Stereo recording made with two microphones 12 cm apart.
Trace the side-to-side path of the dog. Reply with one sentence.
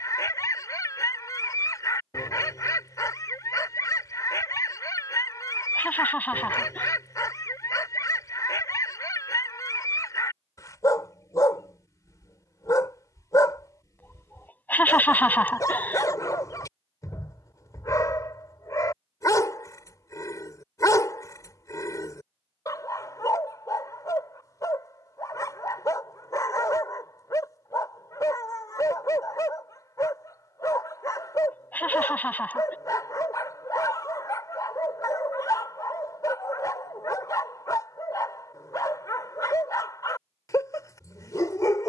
In this clip you hear the dog stay put.